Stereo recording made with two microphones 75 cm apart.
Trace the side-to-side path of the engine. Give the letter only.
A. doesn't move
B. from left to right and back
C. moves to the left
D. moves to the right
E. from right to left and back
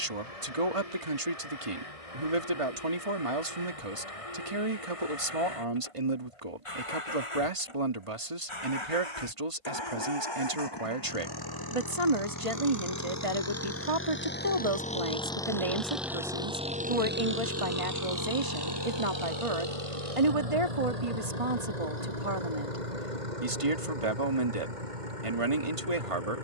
D.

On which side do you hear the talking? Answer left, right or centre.
right.